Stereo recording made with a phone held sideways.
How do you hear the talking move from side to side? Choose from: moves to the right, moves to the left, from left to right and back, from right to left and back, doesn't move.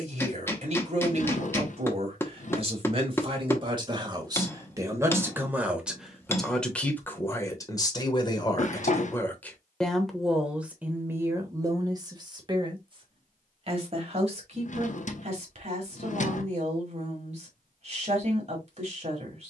from right to left and back.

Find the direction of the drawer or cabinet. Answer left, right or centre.
left.